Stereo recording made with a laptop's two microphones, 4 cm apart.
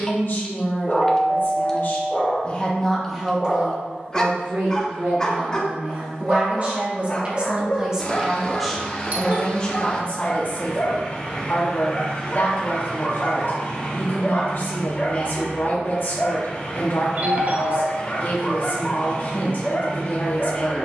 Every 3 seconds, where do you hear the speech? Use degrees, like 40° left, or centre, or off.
50° left, 40° right, 30° right, 30° left, 50° left, 50° left, 50° left.